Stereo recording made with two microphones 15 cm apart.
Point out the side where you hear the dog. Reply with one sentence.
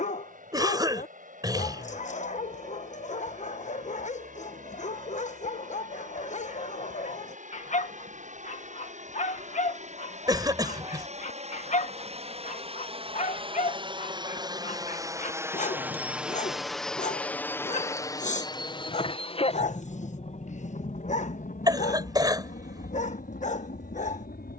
In this clip you hear the dog on the left.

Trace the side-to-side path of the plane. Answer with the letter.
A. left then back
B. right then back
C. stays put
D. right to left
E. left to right
D.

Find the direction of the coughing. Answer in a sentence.
You can hear the coughing on the right.